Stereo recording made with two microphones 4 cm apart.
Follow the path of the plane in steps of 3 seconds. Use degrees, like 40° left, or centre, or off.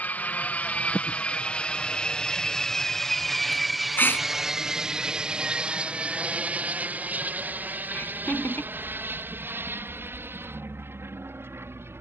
20° left, 10° right, 40° right, 50° right.